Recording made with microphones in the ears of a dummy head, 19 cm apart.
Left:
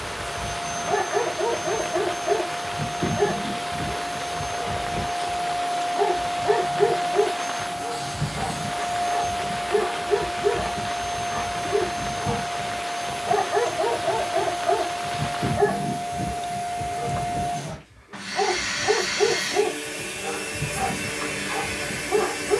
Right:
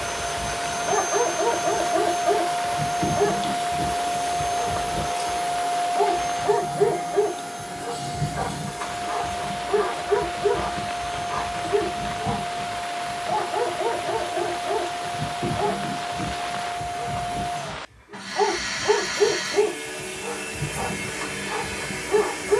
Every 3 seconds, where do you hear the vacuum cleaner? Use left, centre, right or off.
right, right, centre, centre, centre, centre, centre, centre.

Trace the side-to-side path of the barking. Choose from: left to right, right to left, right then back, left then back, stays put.
left then back.